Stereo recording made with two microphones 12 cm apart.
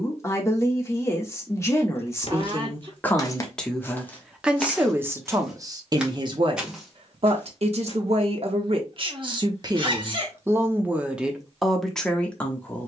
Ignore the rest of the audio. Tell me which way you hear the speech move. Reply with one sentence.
In this clip you hear the speech move from left to right and back again.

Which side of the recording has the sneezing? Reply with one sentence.
In this clip you hear the sneezing on the right.